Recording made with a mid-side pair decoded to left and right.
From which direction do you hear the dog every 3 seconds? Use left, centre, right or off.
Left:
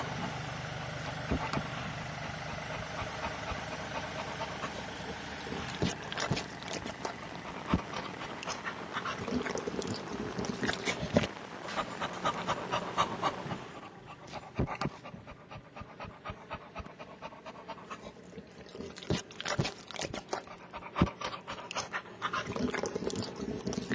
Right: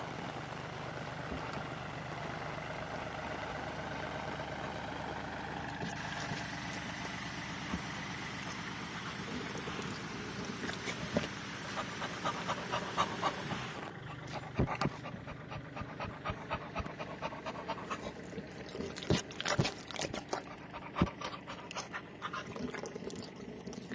left, left, left, left, centre, right, centre, left.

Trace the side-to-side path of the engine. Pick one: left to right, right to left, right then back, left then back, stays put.
left to right.